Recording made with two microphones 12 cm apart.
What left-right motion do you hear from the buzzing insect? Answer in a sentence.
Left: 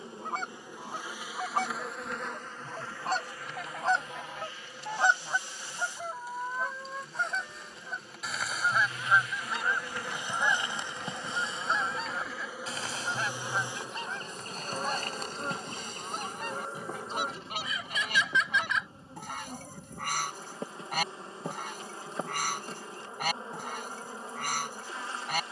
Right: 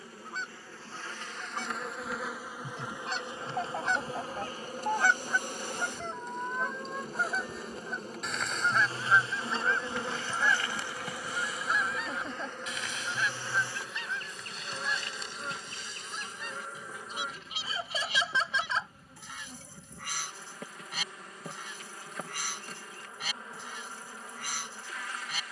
In this clip you hear the buzzing insect move from left to right and back again.